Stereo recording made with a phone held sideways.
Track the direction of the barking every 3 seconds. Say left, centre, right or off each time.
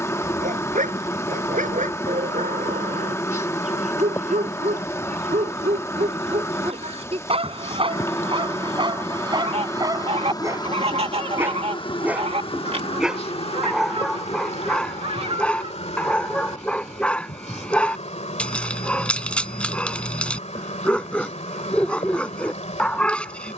right, right, right, right, centre, centre, centre, centre.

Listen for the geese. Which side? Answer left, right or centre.
right.